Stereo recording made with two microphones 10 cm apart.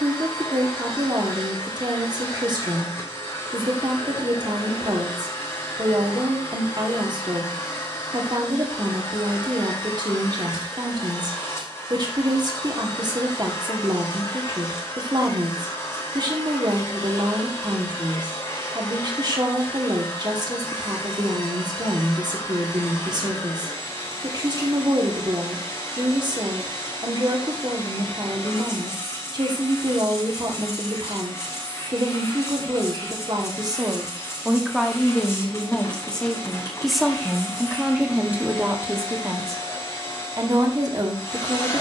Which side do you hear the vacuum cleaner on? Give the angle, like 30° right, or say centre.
30° left.